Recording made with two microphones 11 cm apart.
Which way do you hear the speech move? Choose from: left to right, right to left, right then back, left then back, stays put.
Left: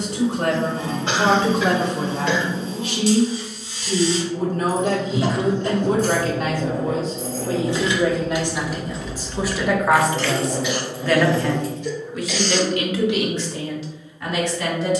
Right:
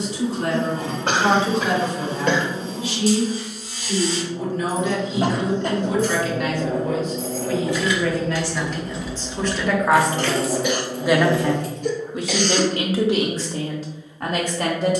left to right.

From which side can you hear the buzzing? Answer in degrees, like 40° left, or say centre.
50° right.